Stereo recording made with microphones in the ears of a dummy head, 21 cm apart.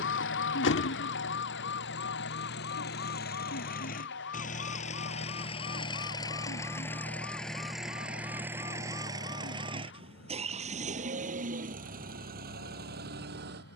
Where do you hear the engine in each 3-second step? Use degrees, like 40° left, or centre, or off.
60° left, 40° left, centre, 30° right, 50° right.